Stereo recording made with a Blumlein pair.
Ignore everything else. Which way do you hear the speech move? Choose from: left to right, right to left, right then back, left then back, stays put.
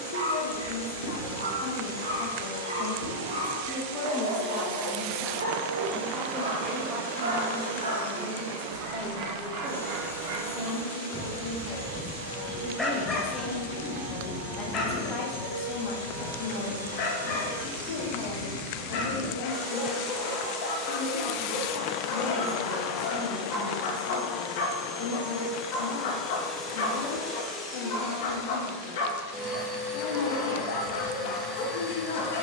right then back.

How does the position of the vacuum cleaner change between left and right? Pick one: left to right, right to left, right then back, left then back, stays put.
right to left.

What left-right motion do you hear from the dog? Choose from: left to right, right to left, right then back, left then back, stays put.
right to left.